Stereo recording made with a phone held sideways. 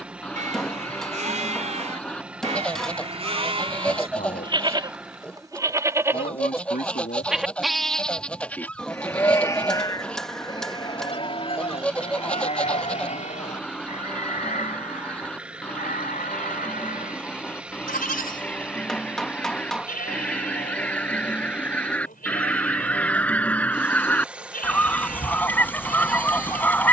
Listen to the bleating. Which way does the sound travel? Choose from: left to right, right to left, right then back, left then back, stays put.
right to left.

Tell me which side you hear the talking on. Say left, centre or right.
left.